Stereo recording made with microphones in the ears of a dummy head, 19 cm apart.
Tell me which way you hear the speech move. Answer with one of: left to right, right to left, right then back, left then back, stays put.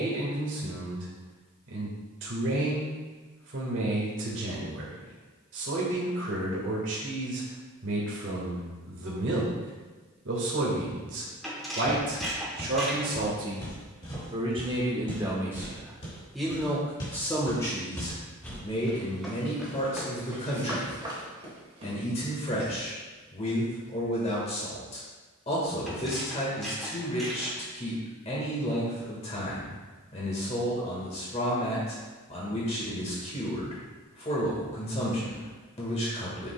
right to left.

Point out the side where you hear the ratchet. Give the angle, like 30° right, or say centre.
centre.